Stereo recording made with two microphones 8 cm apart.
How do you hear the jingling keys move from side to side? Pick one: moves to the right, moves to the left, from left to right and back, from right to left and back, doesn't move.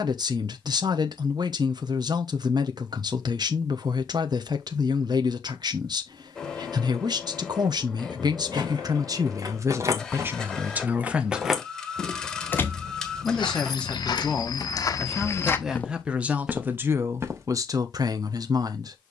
moves to the left.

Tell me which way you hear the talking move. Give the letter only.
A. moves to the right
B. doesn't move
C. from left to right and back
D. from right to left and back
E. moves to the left
D.